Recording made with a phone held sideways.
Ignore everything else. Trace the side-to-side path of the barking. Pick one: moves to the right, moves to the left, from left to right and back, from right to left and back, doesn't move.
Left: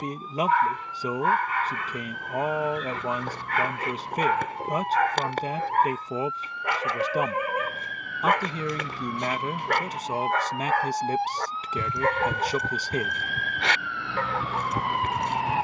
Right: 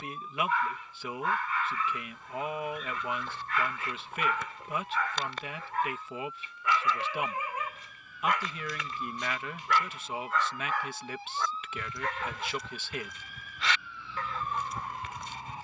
doesn't move.